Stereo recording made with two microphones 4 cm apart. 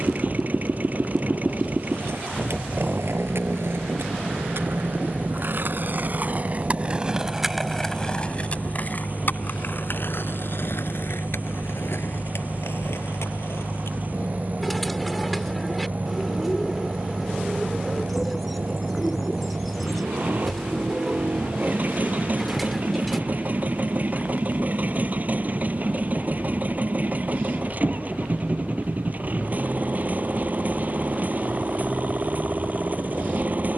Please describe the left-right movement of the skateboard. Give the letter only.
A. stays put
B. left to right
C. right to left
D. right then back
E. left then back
C.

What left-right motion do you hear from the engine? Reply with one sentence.
In this clip you hear the engine stay in one place.